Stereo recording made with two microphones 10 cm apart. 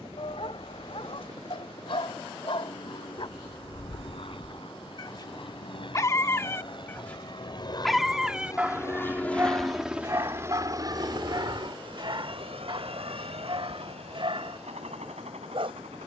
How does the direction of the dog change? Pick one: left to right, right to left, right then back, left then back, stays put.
left to right.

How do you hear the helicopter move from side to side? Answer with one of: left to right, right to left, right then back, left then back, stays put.
left to right.